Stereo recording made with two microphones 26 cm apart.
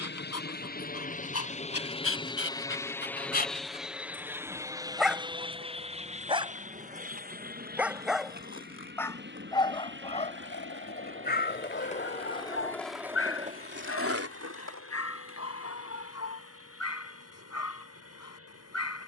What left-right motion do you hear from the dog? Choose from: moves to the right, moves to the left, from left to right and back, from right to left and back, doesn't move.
from left to right and back.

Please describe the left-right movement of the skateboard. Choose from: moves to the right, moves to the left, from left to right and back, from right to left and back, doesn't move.
moves to the right.